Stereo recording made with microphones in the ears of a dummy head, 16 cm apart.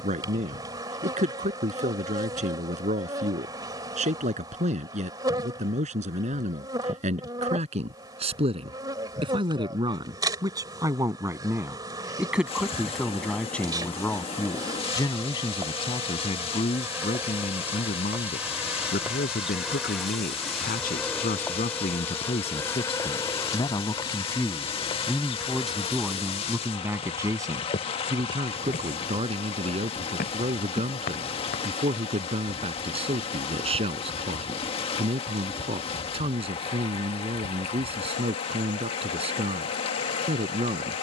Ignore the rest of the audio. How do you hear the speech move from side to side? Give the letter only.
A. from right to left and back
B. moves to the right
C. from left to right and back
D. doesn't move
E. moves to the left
A.